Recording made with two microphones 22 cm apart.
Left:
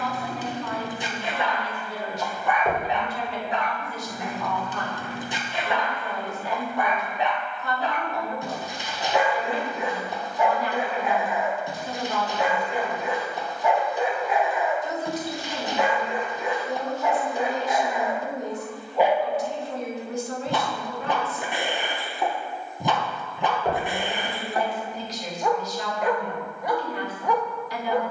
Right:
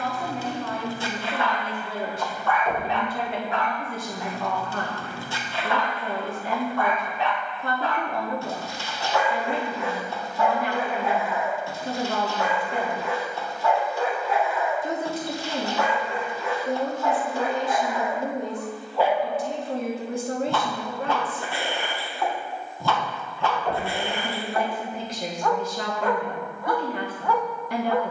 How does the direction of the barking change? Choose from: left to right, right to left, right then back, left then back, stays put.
stays put.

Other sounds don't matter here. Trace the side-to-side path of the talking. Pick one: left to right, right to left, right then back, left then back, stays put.
stays put.